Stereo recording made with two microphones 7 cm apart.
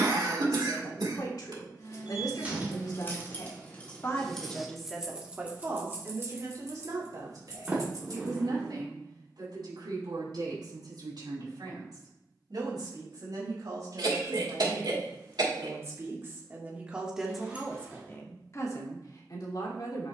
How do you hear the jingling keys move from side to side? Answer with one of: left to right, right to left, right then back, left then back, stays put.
left to right.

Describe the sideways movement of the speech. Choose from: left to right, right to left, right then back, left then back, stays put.
right then back.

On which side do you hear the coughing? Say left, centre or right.
right.